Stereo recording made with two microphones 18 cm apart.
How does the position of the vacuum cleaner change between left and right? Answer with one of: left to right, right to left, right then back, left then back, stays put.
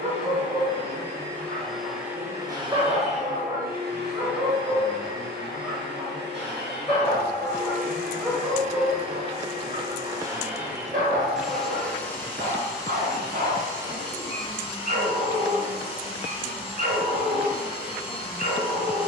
right then back.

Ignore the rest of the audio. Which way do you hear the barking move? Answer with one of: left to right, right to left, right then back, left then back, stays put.
left then back.